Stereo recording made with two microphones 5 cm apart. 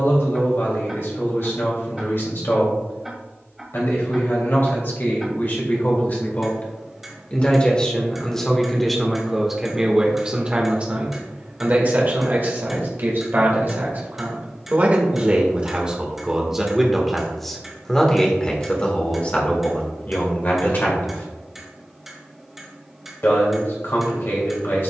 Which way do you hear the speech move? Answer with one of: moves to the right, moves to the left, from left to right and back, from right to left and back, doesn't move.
from left to right and back.